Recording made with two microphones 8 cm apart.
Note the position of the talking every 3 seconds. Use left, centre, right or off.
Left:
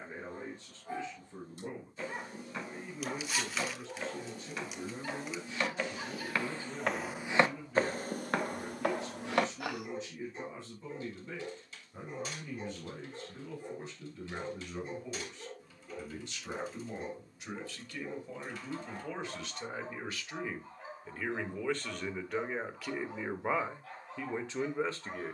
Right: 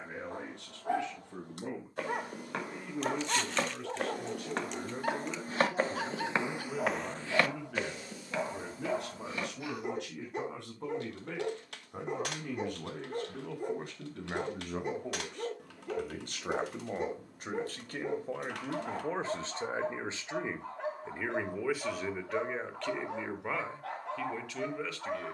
right, right, right, right, right, right, right, centre, left.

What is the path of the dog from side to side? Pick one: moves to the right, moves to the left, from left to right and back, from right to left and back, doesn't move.
doesn't move.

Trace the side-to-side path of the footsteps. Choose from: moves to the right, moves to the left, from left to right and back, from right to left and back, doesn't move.
moves to the left.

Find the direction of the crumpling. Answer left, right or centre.
centre.